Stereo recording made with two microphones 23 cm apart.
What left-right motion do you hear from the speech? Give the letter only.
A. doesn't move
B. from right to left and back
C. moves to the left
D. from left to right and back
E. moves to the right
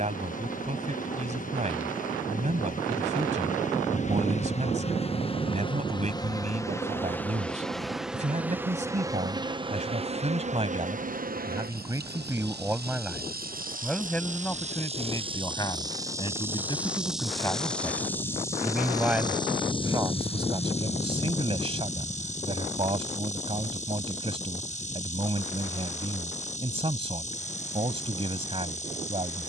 B.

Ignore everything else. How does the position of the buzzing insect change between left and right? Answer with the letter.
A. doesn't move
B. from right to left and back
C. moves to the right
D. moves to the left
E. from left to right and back
E.